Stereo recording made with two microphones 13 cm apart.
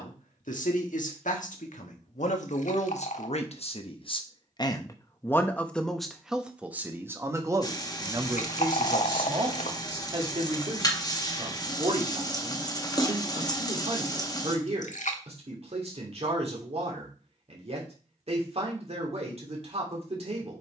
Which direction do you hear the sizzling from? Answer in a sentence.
You can hear the sizzling on the left.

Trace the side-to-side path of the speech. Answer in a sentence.
In this clip you hear the speech move from left to right.